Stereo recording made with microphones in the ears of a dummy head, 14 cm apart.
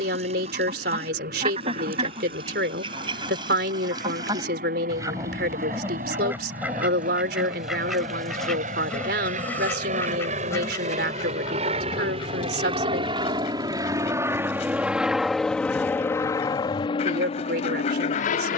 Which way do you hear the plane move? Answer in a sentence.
You can hear the plane move from right to left.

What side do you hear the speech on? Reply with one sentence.
In this clip you hear the speech on the right.